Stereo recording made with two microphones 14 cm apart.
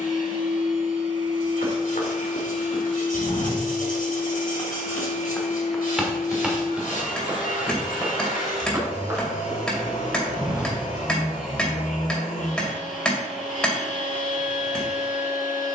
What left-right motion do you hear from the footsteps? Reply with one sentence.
In this clip you hear the footsteps move from left to right.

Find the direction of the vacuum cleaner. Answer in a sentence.
You can hear the vacuum cleaner on the left.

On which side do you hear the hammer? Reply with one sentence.
In this clip you hear the hammer in the centre.